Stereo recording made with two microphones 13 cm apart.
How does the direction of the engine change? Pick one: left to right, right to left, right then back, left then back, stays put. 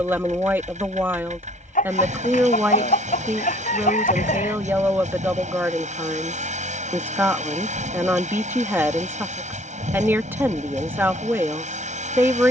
stays put.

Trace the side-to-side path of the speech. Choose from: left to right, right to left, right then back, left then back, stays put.
stays put.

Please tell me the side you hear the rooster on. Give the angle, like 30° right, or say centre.
80° left.